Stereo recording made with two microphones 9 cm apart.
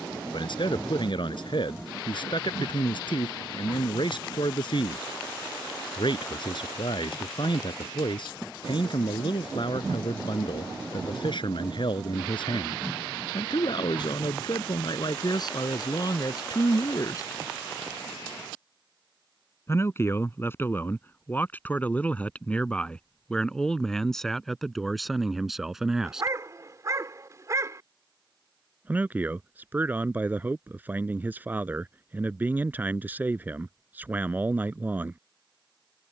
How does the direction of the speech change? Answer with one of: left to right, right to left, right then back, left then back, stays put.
left to right.